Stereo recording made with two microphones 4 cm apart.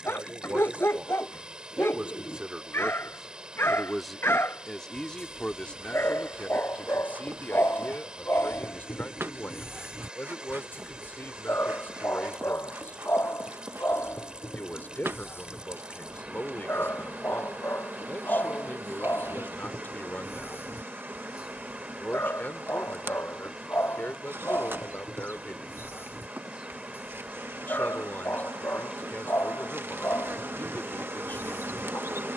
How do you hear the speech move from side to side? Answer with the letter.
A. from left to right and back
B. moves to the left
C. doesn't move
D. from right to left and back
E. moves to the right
B.